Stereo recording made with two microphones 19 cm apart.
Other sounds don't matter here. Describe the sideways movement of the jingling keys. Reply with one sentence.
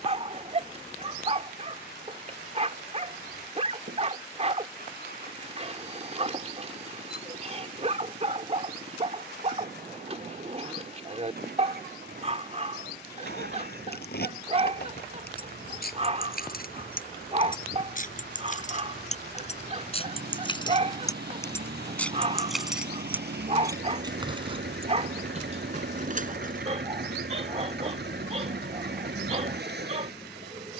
In this clip you hear the jingling keys go from the left side to the right.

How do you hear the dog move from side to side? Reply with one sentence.
You can hear the dog stay put.